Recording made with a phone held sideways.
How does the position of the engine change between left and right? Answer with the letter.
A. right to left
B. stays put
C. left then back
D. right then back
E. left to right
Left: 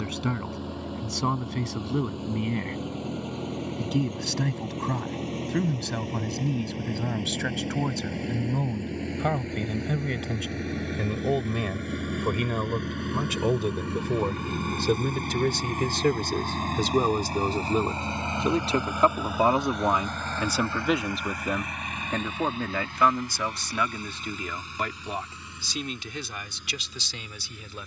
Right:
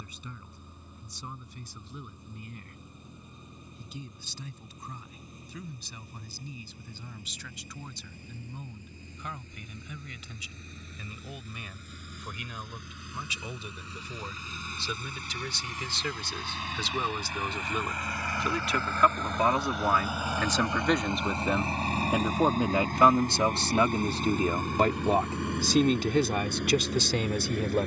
E.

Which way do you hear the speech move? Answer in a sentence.
You can hear the speech move from left to right.